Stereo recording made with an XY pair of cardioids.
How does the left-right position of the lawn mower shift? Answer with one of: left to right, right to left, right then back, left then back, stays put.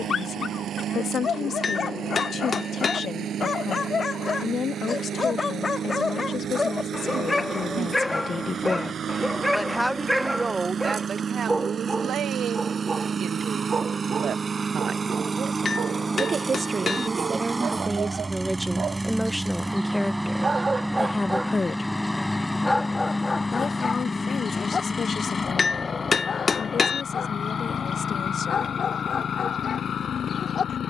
right to left.